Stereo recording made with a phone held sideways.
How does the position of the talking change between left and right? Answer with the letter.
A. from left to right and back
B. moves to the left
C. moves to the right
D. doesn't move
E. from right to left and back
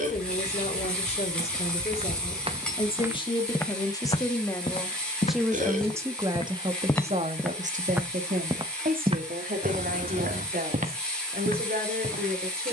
C.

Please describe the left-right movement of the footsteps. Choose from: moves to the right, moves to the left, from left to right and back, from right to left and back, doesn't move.
from right to left and back.